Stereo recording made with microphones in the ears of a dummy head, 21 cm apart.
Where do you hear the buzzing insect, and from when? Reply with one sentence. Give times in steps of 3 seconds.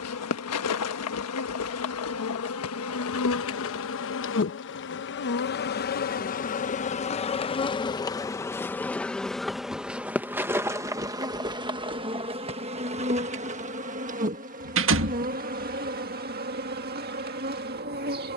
In this clip you hear the buzzing insect on the left from 0 s, in the centre from 9 s and on the right from 12 s.